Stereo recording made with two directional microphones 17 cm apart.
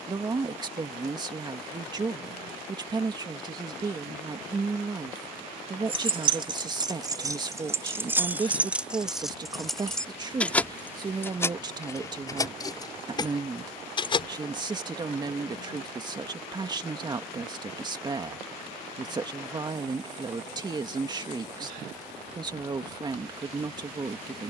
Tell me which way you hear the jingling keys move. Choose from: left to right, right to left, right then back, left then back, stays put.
right to left.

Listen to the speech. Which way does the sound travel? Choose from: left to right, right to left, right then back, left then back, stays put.
stays put.